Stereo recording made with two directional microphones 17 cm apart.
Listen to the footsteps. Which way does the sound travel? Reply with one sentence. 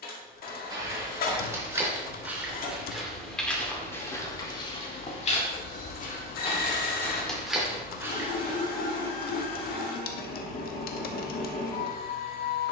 You can hear the footsteps move from right to left and back again.